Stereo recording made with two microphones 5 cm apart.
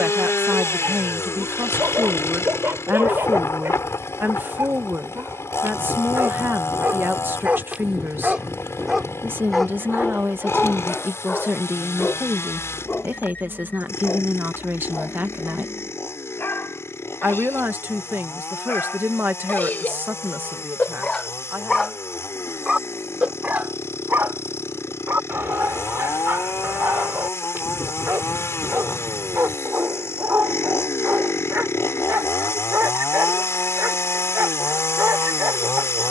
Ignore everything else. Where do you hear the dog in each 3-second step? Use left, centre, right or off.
right, right, right, centre, left, left, left, centre, right, right, right, right.